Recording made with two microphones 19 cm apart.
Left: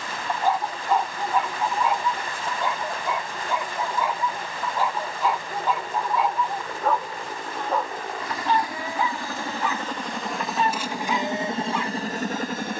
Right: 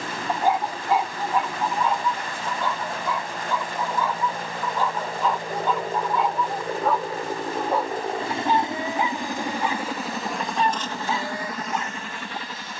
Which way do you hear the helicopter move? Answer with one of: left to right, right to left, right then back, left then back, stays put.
right to left.